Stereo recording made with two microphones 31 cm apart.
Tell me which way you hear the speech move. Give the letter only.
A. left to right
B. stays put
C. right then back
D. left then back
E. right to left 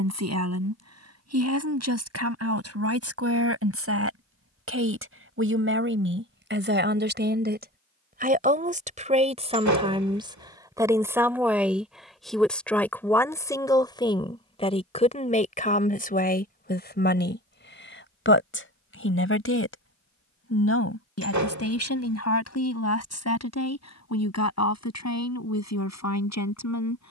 E.